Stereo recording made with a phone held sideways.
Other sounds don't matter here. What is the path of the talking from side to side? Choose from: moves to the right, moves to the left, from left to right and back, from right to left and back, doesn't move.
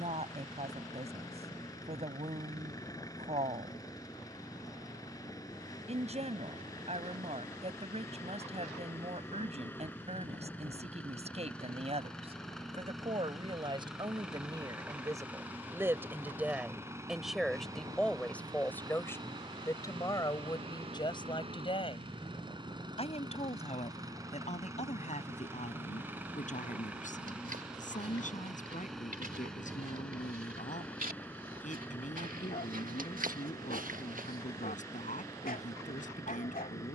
moves to the left.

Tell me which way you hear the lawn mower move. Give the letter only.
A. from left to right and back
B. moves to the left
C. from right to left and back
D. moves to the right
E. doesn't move
A.